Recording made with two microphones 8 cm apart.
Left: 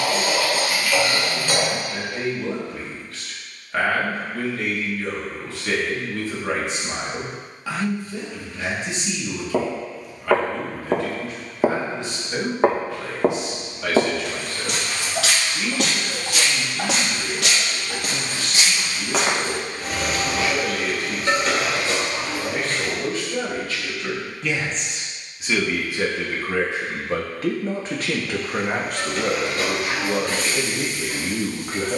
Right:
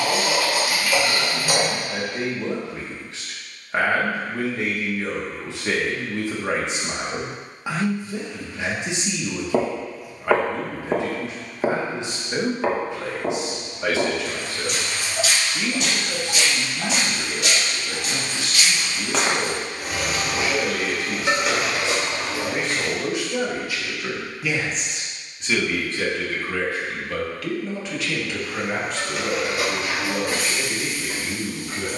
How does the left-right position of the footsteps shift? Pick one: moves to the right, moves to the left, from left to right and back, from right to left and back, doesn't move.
from right to left and back.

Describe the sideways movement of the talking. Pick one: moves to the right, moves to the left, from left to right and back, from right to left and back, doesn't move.
moves to the left.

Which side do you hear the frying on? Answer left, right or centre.
centre.